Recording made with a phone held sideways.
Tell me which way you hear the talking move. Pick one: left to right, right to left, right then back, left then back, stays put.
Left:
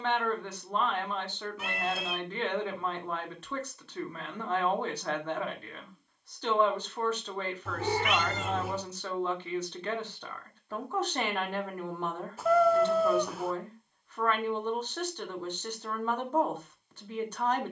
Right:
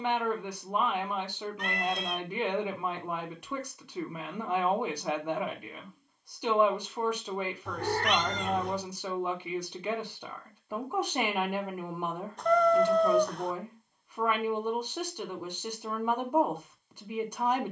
stays put.